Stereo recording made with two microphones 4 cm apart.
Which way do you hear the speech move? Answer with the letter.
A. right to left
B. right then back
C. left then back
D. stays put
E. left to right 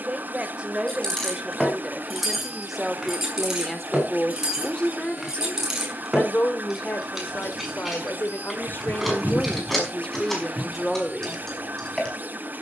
C.